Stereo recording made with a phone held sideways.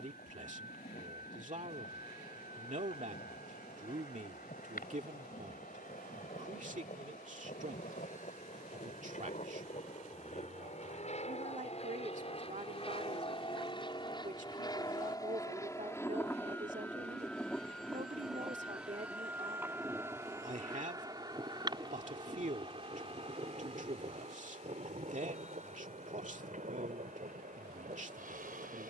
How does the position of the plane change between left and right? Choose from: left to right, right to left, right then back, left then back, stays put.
left to right.